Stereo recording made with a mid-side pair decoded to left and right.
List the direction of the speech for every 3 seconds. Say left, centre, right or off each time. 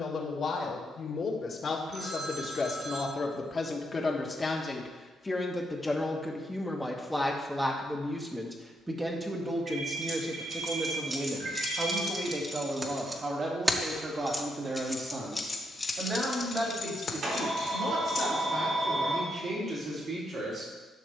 left, left, centre, right, right, right, right.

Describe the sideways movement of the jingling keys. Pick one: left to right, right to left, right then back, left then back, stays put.
right to left.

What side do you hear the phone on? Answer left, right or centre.
right.